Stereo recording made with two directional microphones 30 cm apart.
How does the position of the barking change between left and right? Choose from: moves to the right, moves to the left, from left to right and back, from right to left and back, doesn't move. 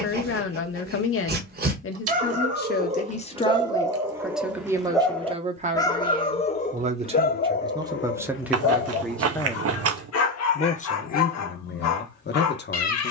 moves to the left.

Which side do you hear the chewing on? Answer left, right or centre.
right.